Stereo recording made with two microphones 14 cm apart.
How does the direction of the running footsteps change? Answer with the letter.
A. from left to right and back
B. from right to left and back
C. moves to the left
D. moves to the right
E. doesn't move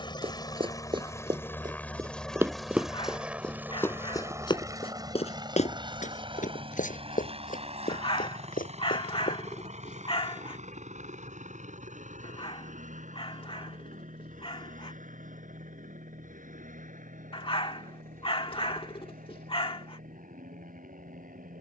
C.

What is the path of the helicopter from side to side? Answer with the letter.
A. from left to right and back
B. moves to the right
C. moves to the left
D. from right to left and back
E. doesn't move
B.